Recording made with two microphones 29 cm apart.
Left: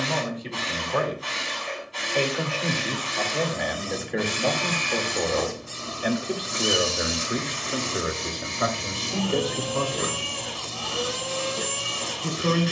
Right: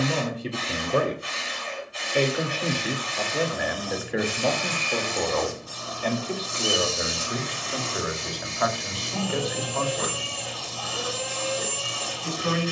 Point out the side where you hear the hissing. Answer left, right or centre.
left.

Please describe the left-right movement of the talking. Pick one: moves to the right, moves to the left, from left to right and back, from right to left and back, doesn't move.
moves to the left.